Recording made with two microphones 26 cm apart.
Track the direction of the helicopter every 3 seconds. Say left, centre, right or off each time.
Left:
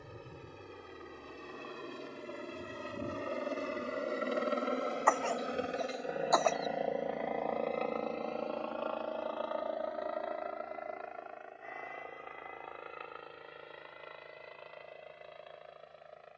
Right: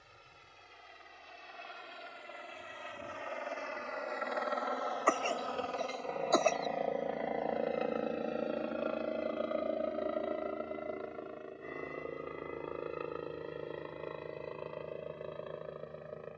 left, left, centre, right, right, right.